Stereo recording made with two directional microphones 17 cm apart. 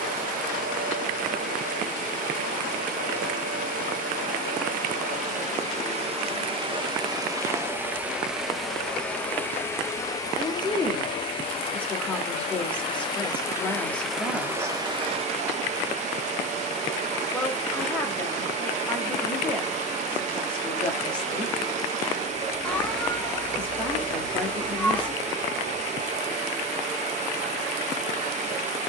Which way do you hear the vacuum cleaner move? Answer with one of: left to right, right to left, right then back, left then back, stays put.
left then back.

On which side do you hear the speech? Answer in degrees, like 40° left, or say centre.
10° left.